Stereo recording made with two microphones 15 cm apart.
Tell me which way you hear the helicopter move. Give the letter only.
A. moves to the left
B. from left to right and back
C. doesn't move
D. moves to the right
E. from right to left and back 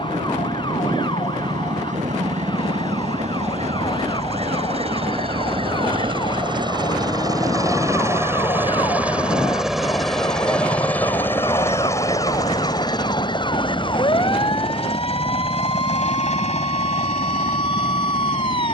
A.